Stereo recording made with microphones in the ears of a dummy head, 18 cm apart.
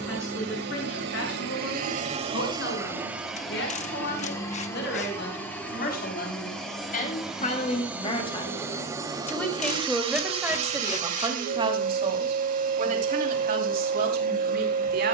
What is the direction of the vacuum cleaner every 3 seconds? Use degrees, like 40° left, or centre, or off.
40° right, 10° left, centre, 30° right, 40° right.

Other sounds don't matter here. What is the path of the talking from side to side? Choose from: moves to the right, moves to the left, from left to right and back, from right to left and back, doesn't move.
moves to the right.